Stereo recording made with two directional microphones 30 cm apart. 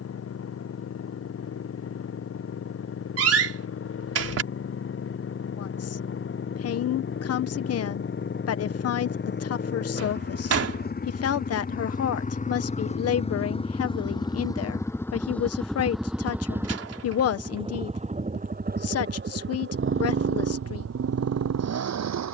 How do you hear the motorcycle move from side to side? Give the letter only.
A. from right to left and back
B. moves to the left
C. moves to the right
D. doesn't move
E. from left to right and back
C.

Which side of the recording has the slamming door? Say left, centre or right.
right.